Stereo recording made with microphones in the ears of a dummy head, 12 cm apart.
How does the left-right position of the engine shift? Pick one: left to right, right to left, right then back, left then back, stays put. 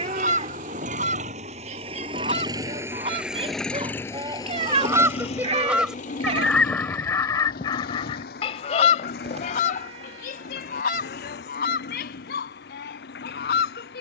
right to left.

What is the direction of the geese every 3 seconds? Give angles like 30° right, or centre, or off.
50° right, 20° right, 20° left, 60° left, 70° left.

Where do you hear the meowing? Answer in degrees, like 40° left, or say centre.
50° right.